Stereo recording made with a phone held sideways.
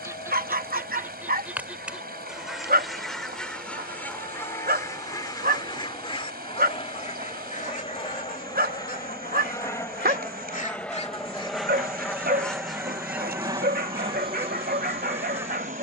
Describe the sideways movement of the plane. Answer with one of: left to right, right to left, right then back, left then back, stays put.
left to right.